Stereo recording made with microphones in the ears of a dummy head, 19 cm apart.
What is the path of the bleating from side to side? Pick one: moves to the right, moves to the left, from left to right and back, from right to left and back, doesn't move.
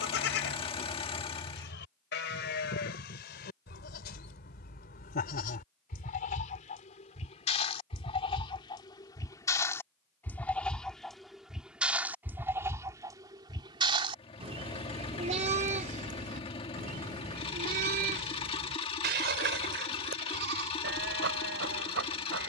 moves to the right.